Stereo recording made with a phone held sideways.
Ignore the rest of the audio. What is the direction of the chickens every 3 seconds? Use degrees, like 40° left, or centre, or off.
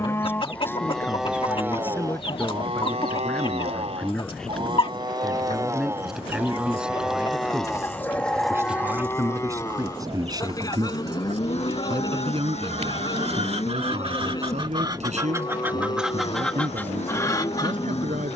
40° left, 40° left, 20° left, 40° right, 50° right, centre.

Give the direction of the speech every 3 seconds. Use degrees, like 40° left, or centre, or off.
10° left, centre, 10° right, 30° right, 50° right, 70° right.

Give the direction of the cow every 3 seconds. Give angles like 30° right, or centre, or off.
10° right, 40° right, centre, 30° left, 30° left, 30° left.